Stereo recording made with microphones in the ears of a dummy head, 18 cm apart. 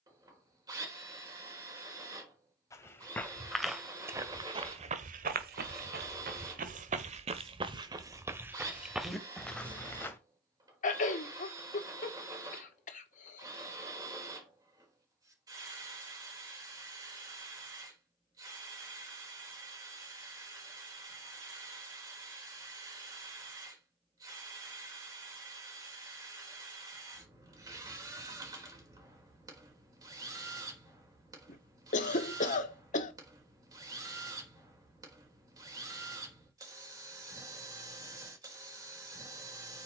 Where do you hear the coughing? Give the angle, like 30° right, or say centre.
40° left.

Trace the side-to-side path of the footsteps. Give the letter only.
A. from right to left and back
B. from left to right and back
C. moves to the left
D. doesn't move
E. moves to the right
B.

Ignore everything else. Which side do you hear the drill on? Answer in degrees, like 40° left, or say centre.
20° right.